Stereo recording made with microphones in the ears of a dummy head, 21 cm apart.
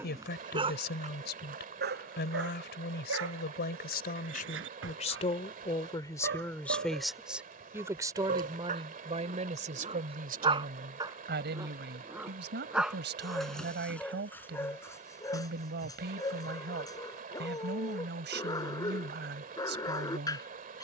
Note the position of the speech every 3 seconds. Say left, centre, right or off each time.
left, left, centre, right, right, right, right.